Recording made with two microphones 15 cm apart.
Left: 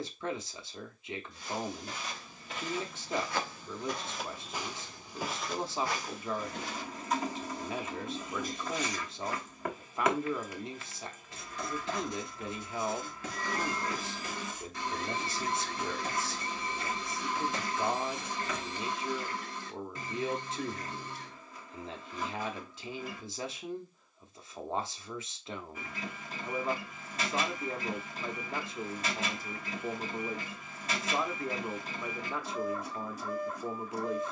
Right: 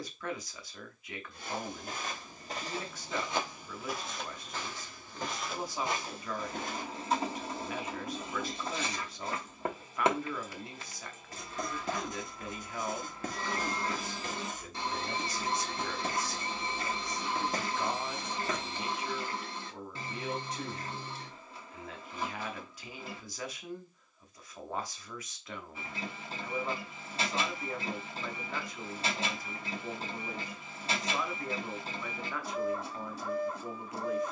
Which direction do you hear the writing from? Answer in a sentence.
You can hear the writing on the right.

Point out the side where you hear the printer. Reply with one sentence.
In this clip you hear the printer on the right.